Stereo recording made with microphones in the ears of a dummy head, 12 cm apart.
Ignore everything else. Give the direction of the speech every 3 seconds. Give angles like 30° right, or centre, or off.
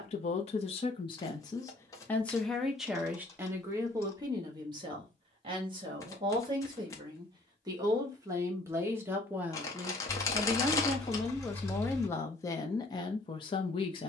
30° left, 30° right, 30° right, centre, 30° left.